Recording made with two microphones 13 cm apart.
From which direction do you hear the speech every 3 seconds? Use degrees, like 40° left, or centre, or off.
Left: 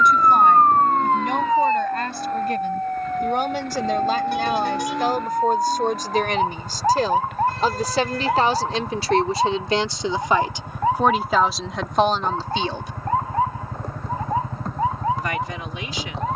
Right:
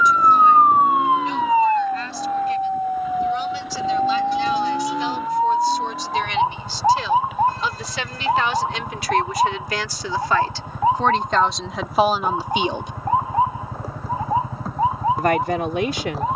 60° left, 50° left, 40° left, 20° left, 10° right, 60° right.